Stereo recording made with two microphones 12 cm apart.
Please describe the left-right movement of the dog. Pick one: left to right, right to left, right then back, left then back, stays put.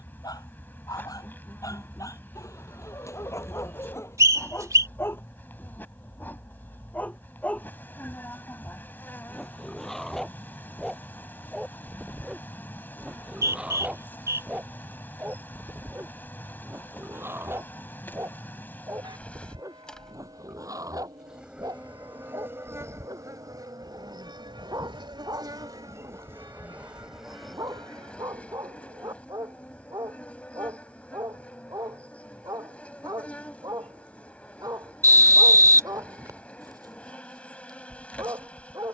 left to right.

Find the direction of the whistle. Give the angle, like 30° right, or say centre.
30° right.